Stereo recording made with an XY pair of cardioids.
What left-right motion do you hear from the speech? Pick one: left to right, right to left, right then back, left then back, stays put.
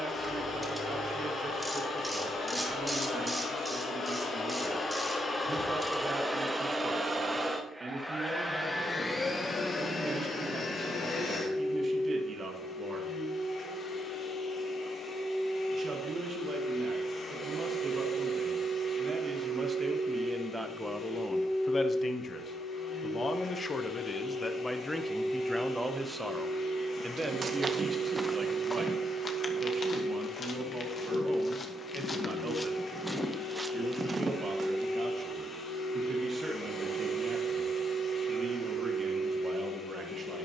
left then back.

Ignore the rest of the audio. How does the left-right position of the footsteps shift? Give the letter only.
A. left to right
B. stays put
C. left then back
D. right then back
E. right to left
C.